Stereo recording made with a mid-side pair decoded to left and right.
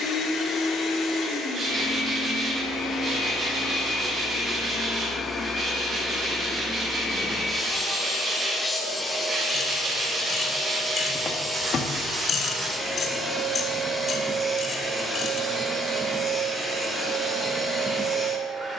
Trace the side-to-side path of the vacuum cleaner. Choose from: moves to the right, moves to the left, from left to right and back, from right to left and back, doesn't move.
moves to the right.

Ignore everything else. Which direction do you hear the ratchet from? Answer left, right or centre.
left.